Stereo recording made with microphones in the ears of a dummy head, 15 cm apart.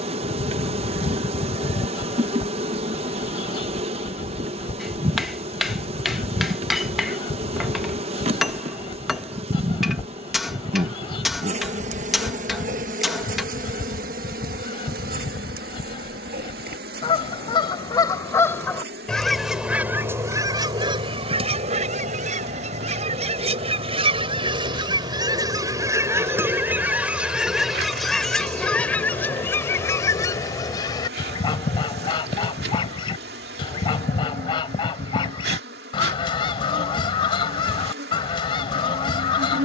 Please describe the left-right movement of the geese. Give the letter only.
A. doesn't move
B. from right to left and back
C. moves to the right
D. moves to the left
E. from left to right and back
E.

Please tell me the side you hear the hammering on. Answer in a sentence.
In this clip you hear the hammering in the centre.